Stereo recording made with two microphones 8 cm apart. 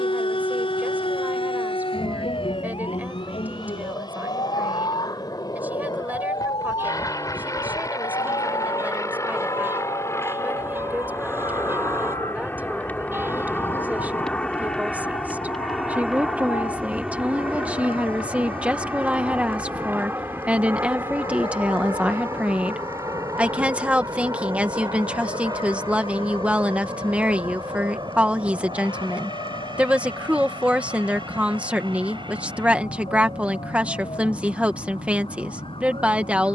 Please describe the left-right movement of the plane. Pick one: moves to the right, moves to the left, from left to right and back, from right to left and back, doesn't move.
moves to the right.